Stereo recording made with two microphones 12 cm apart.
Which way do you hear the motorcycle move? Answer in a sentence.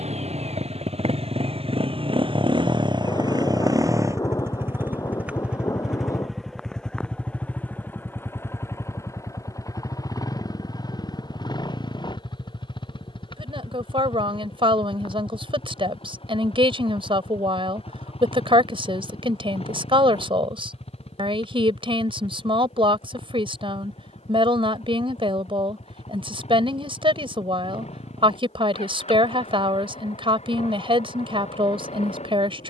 In this clip you hear the motorcycle go from the right side to the left.